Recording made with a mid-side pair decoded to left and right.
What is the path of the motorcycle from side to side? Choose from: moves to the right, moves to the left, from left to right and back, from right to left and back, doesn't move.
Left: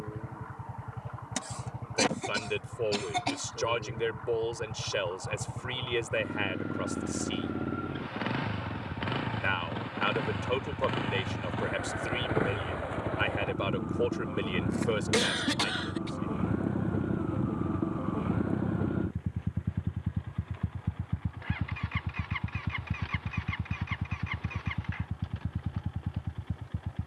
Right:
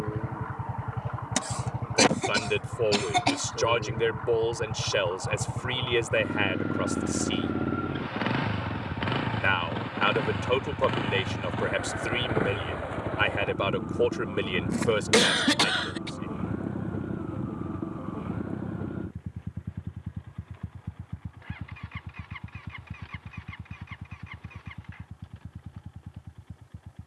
moves to the left.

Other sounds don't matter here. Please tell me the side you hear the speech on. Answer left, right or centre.
right.